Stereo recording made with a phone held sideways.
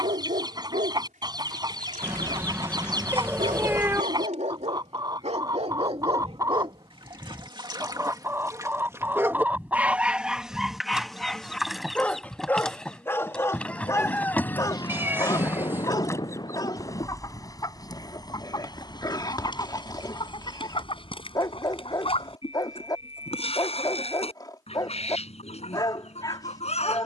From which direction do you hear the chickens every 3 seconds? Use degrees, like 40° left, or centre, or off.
30° right, 30° right, 20° right, 10° right, 10° left, 20° left, 40° left, 50° left, 50° left.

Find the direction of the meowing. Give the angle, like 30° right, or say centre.
20° right.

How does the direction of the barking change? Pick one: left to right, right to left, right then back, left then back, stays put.
right to left.